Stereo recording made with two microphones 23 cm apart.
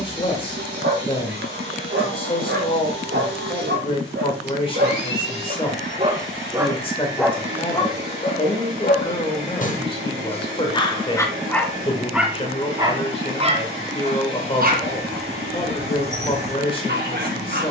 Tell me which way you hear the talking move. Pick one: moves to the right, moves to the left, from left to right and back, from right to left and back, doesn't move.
doesn't move.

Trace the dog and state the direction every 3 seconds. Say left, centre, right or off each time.
right, right, centre, left, right, right.